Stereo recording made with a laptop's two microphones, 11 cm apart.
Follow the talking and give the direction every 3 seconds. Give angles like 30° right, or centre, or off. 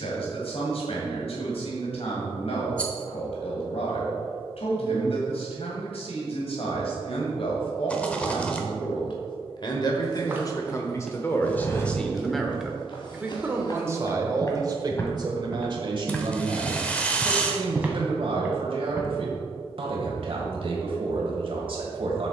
70° left, 70° left, 60° left, 30° left, 20° right, 50° right, 60° right, 60° right.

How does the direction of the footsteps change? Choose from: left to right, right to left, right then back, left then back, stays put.
left then back.